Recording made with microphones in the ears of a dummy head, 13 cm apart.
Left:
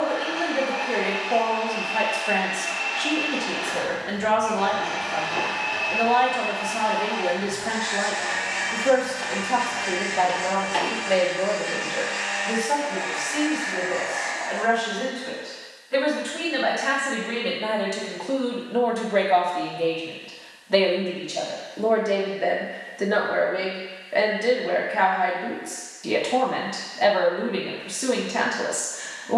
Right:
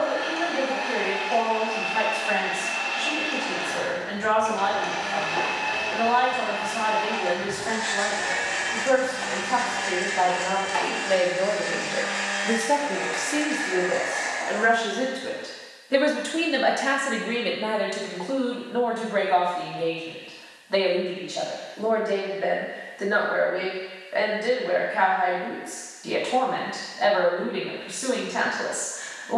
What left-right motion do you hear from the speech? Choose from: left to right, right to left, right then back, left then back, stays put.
right then back.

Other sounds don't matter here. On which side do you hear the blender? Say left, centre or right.
right.